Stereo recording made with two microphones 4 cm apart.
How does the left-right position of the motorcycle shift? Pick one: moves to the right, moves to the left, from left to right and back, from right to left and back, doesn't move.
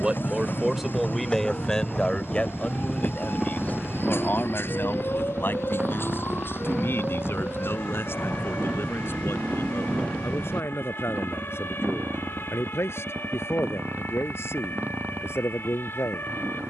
moves to the right.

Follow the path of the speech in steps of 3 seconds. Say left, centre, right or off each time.
centre, left, left, left, left, left.